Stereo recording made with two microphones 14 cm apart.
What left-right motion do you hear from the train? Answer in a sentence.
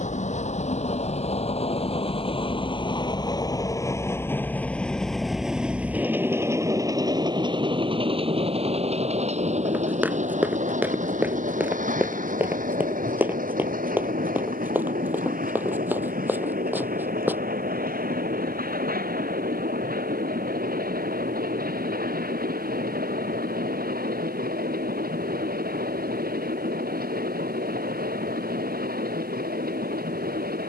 You can hear the train go from the left side to the right.